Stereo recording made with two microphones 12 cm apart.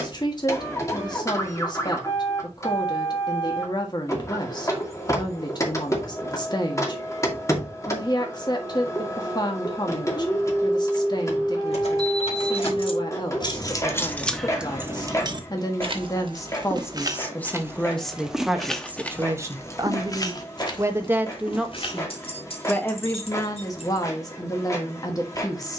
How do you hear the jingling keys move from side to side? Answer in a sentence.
In this clip you hear the jingling keys move from left to right and back again.